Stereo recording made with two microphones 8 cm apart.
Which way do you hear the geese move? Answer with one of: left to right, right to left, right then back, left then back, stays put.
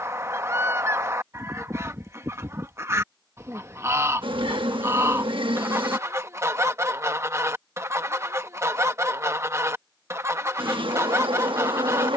stays put.